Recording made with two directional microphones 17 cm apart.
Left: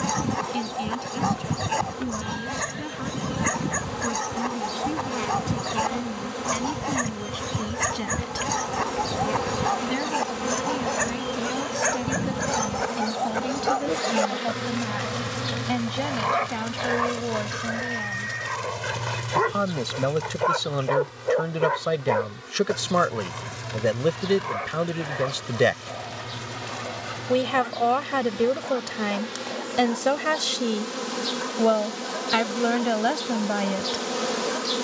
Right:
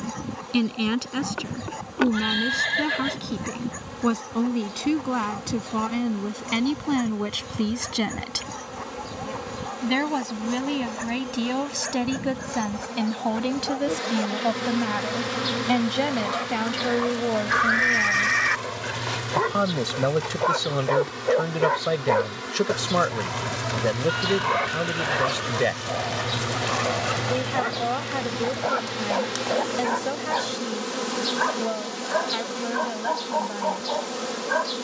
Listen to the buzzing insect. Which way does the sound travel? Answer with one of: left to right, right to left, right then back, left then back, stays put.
right then back.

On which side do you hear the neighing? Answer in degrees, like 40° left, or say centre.
70° right.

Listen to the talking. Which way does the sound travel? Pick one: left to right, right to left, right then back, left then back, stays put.
right to left.